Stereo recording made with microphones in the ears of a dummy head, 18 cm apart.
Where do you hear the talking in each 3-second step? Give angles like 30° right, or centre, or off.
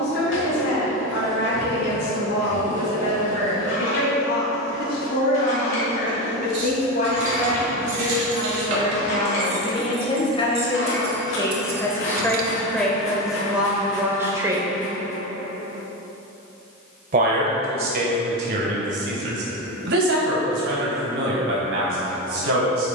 60° left, 50° left, 40° left, 30° left, centre, 50° right, 60° right, 70° right.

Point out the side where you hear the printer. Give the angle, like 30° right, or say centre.
70° left.